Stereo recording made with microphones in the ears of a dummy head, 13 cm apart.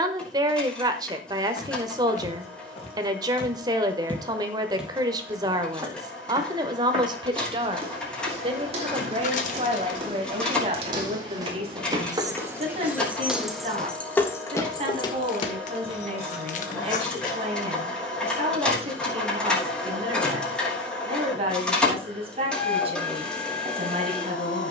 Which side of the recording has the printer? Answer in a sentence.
You can hear the printer in the centre.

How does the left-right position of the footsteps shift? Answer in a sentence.
In this clip you hear the footsteps go right and come back.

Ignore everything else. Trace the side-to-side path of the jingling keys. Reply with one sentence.
In this clip you hear the jingling keys move from right to left.